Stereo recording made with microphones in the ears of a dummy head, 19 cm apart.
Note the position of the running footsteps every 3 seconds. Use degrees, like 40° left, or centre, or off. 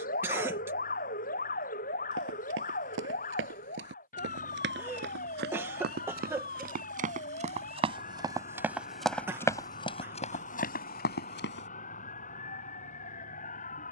60° right, 60° right, 30° right, 30° left, off.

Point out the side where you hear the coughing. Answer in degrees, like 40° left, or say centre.
10° right.